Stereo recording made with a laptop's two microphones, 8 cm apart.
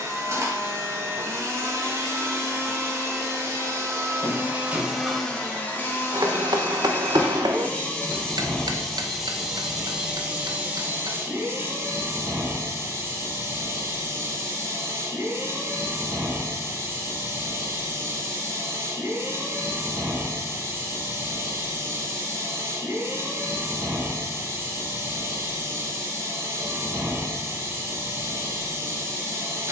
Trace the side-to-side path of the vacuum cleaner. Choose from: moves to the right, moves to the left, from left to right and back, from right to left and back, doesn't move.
from right to left and back.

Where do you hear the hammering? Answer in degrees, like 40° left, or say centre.
70° right.